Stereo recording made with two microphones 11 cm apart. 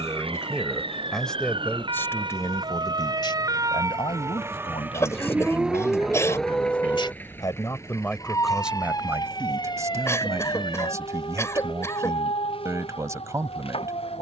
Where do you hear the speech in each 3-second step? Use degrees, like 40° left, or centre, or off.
10° left, 60° left, 30° left, 30° right, 30° right.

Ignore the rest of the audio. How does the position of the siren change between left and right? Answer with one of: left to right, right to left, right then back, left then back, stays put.
right to left.